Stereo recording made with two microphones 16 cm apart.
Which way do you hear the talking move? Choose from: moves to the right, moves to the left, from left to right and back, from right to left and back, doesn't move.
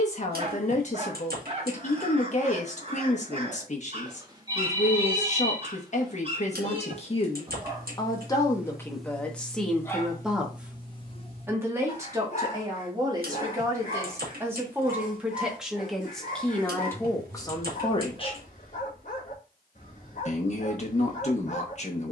from left to right and back.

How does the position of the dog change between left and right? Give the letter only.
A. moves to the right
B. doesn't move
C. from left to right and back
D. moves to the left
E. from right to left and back
D.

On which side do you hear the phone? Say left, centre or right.
right.